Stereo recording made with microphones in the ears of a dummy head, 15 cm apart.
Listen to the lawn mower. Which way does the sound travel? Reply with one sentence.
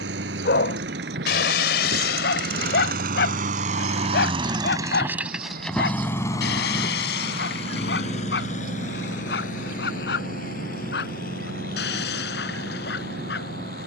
In this clip you hear the lawn mower move from right to left.